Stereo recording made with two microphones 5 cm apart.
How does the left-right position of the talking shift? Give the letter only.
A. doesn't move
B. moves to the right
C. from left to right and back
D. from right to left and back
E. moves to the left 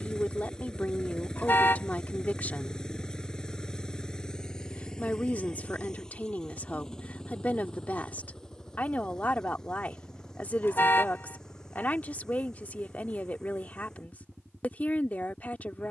A.